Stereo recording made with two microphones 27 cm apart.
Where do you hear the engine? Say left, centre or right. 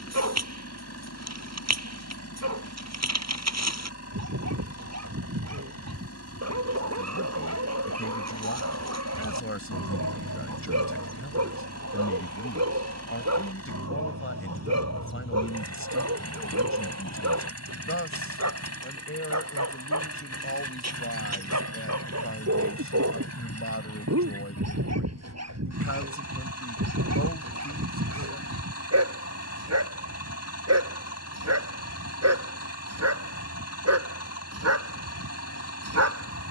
left.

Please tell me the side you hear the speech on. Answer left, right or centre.
left.